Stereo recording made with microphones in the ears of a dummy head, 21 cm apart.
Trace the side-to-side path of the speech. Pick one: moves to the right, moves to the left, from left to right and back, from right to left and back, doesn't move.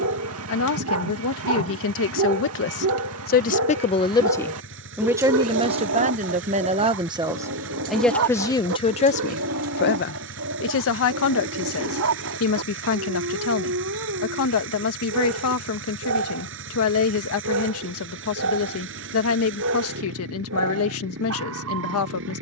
from left to right and back.